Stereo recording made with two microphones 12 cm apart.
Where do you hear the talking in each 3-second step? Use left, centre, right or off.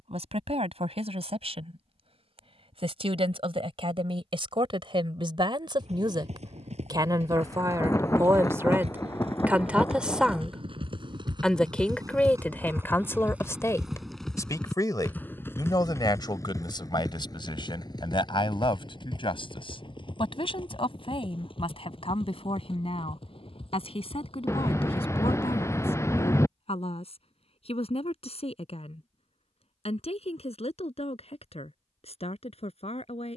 right, right, right, centre, left, left, left, left, left, left, left.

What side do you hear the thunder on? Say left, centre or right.
left.